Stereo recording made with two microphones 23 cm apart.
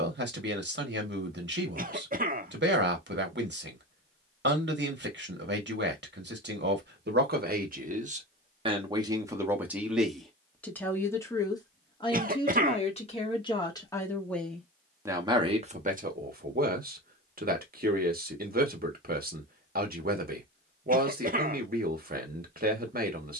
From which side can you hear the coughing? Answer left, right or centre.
right.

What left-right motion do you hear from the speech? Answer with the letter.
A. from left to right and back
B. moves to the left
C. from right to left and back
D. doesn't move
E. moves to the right
C.